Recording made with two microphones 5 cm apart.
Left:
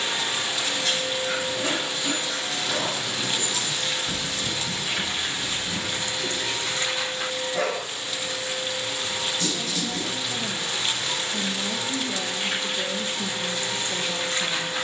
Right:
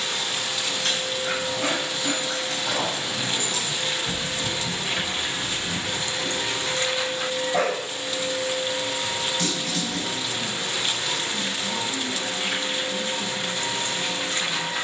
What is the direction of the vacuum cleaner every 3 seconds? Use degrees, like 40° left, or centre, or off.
10° left, 30° right, 50° right, 60° right, 60° right.